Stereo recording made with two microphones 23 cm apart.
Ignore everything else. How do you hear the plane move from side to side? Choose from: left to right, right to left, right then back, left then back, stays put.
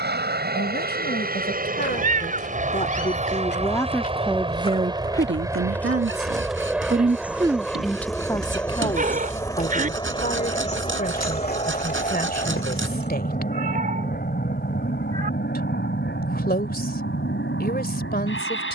right to left.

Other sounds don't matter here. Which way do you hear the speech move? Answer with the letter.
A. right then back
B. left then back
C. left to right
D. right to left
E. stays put
A.